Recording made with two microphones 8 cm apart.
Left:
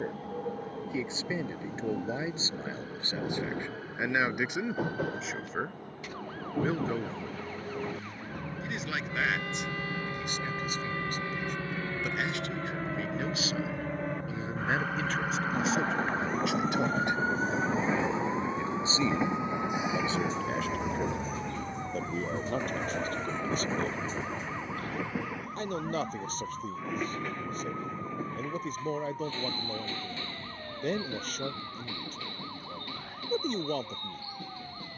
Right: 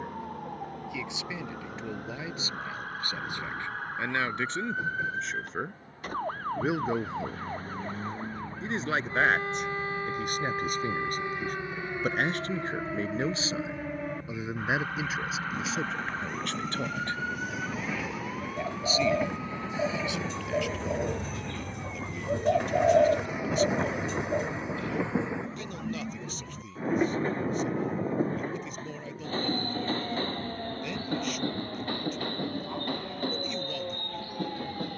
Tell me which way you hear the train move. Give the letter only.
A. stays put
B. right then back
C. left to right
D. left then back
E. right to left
C.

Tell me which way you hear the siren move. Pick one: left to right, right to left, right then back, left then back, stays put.
right to left.